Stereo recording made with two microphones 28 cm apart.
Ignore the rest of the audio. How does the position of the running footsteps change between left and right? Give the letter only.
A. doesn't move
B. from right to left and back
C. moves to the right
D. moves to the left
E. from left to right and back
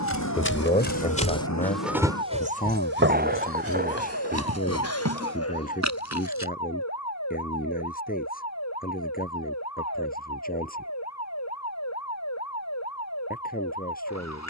C.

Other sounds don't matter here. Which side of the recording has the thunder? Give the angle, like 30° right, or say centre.
30° right.